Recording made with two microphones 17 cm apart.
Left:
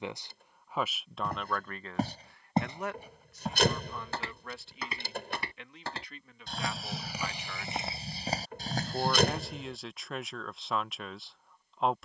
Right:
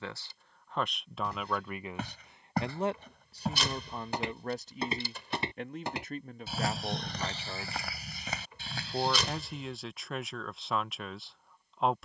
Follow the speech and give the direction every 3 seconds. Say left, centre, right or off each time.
centre, right, right, centre.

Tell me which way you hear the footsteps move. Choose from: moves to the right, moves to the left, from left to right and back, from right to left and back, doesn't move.
from left to right and back.